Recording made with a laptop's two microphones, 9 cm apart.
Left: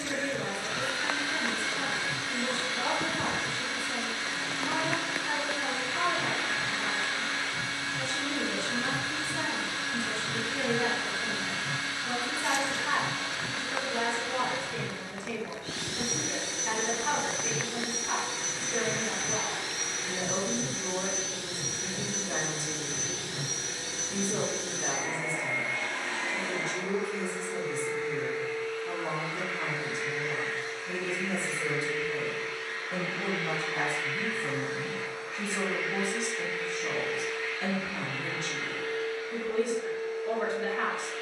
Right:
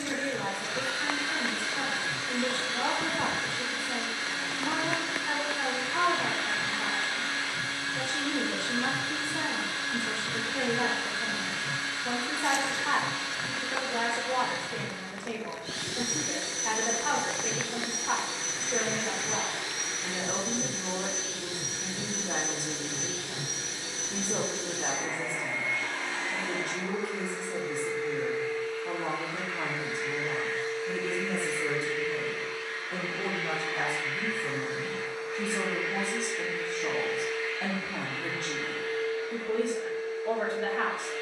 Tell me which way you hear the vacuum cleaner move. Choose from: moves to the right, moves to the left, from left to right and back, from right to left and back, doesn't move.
doesn't move.